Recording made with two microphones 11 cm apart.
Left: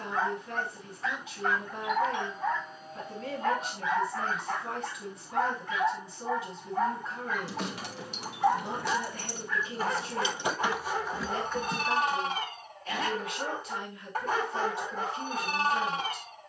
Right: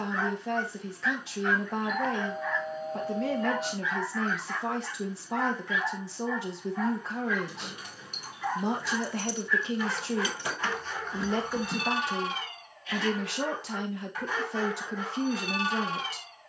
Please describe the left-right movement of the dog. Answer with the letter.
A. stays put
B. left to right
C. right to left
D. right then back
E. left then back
A.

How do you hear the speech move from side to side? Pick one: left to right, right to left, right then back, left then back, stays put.
stays put.